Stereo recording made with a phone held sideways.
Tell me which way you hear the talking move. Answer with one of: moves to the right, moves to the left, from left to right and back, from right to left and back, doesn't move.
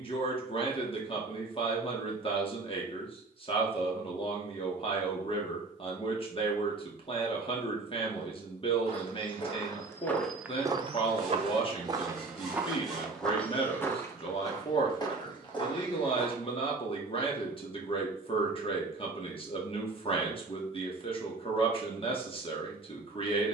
doesn't move.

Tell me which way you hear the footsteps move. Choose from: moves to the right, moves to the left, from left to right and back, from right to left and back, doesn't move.
from left to right and back.